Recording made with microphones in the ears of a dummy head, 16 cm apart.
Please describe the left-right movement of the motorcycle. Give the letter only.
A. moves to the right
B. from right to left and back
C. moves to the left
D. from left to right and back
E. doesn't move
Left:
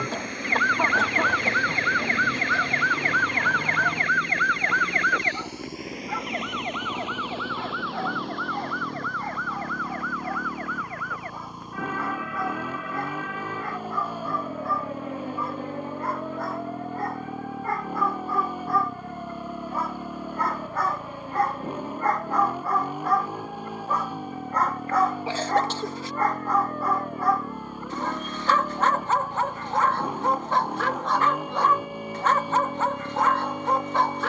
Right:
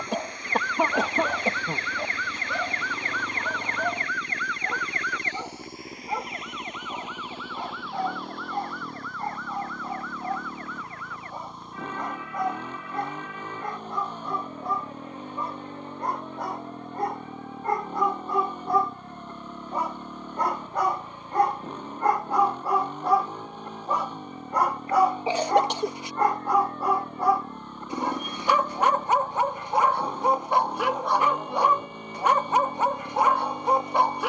E.